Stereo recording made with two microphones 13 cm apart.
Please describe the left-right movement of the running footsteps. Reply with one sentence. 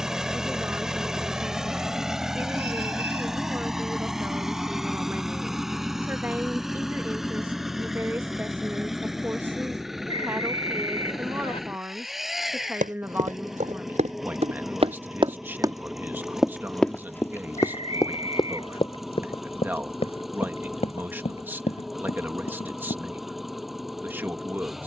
You can hear the running footsteps travel towards the left.